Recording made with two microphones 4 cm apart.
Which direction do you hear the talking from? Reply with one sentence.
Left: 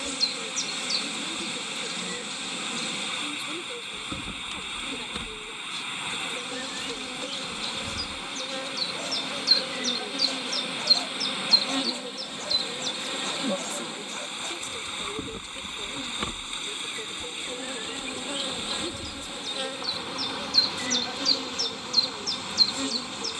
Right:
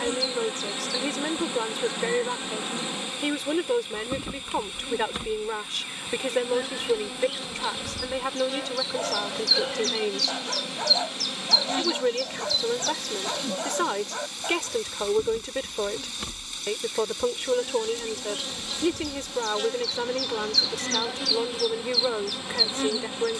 In this clip you hear the talking on the right.